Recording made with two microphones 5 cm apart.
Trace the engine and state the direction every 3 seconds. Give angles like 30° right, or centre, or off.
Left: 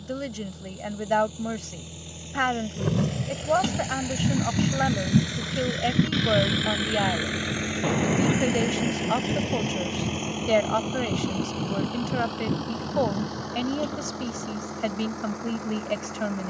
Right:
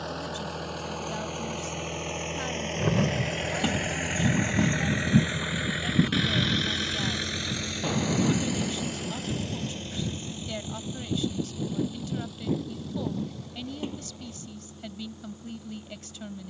60° right, 30° right, 20° left, 60° left, 70° left, 70° left.